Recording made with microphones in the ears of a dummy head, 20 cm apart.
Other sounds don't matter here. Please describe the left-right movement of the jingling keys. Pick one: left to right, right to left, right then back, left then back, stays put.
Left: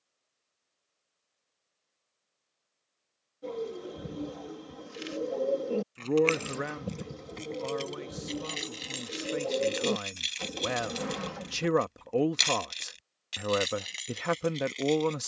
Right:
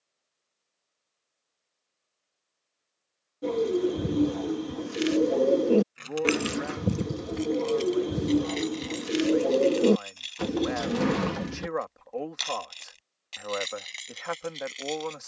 left then back.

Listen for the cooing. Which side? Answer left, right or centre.
right.